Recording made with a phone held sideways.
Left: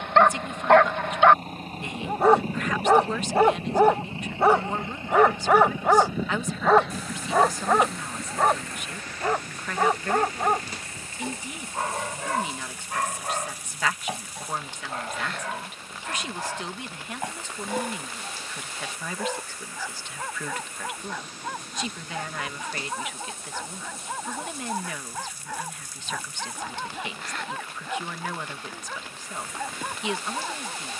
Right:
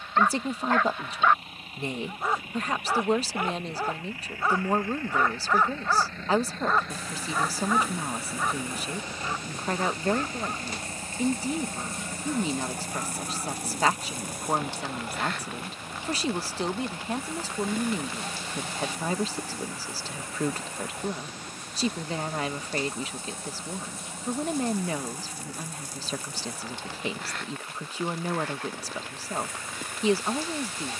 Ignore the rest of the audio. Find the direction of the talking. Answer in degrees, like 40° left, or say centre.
30° right.